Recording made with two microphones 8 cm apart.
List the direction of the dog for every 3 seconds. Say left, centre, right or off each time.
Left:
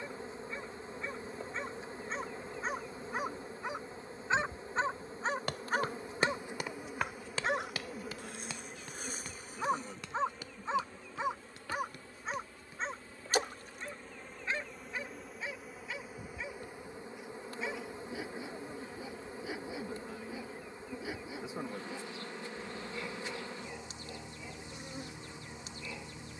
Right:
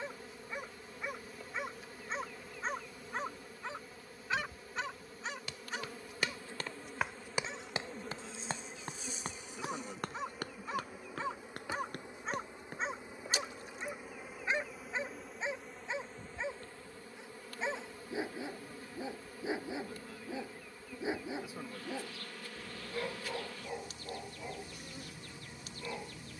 centre, left, left, left, centre, right, right, right, right.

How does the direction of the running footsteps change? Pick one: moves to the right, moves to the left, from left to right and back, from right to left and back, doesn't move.
moves to the right.